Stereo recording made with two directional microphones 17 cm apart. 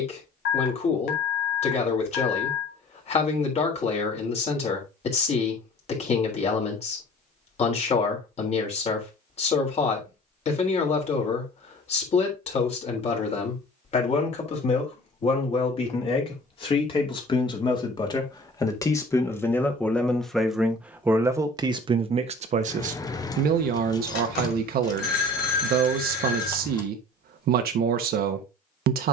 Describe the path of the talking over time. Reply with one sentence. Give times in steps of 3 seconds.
In this clip you hear the talking on the left from 0 s, in the centre from 18 s and on the right from 21 s.